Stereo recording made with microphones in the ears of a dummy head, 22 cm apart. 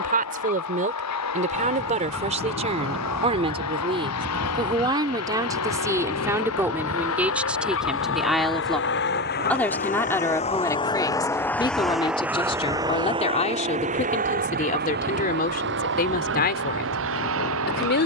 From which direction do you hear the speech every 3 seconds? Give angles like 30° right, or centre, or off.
30° right, 20° right, 10° right, 10° left, 30° left, 40° left.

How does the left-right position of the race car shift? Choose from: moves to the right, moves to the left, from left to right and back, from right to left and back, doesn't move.
moves to the right.